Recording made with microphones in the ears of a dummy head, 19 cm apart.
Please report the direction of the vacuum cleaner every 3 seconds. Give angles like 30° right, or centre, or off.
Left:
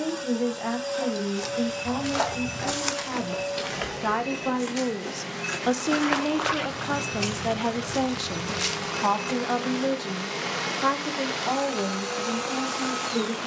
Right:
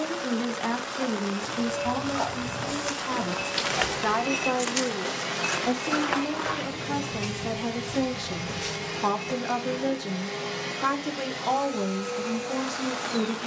30° left, 20° right, 20° right, 20° left, 50° left.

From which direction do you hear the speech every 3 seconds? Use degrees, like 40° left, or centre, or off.
20° right, 10° left, 30° left, 10° right, 20° right.